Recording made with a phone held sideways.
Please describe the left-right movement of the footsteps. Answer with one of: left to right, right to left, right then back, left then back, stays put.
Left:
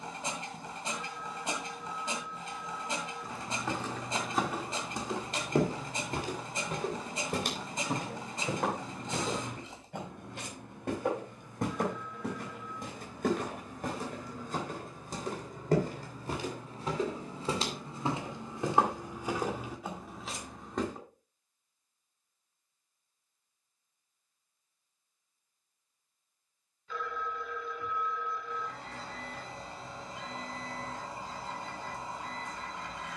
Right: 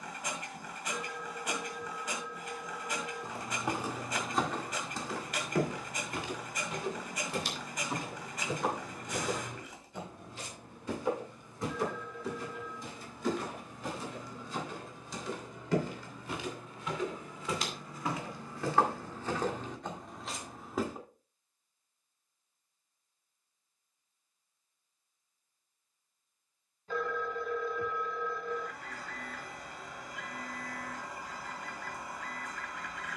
left then back.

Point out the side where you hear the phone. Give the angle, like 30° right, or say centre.
40° right.